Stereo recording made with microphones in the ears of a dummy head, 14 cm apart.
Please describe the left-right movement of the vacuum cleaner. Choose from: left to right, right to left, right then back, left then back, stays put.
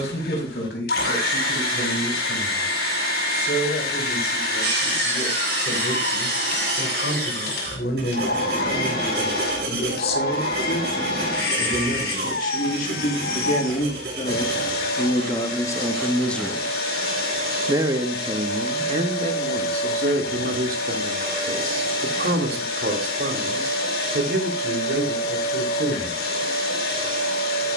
stays put.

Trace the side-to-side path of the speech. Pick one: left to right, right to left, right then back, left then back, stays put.
left to right.